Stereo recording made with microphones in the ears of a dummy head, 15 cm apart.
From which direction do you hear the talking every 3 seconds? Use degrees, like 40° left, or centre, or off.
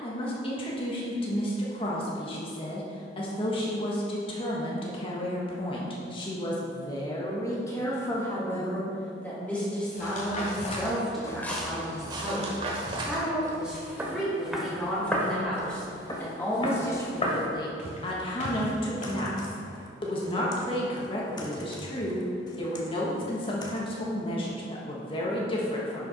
30° left, 30° left, 20° left, centre, centre, 10° left, 30° left, 30° left, 30° left.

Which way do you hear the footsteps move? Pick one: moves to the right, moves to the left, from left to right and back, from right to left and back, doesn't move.
from left to right and back.